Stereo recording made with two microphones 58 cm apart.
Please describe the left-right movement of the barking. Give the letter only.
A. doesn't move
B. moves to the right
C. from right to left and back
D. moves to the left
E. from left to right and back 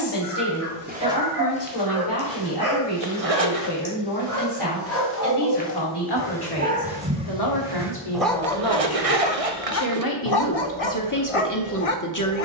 D.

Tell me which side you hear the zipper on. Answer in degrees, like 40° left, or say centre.
70° right.